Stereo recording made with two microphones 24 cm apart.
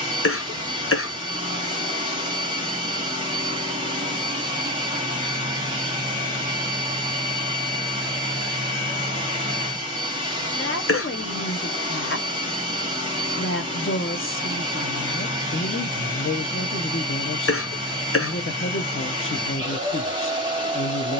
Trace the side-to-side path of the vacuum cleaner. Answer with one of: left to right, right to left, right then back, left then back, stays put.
stays put.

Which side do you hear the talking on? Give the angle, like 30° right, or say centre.
60° left.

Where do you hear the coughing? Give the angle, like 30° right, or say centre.
60° left.